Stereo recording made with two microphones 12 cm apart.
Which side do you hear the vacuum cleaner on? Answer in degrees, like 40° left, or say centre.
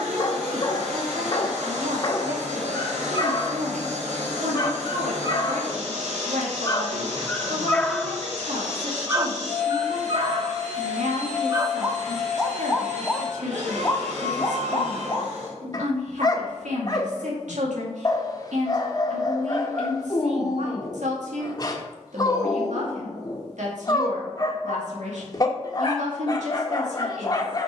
80° right.